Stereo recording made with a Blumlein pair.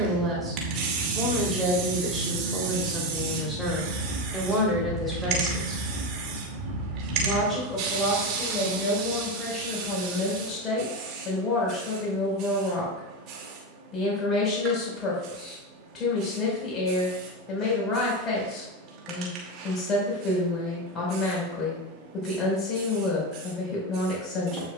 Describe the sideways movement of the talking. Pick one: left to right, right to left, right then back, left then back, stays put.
right to left.